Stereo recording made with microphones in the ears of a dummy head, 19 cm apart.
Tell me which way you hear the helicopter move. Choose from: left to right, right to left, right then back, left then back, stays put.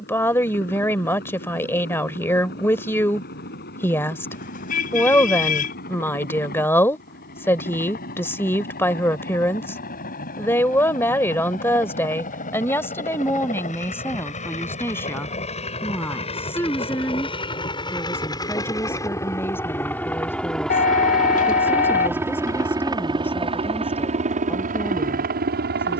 left to right.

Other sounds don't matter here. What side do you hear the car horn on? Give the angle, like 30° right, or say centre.
40° left.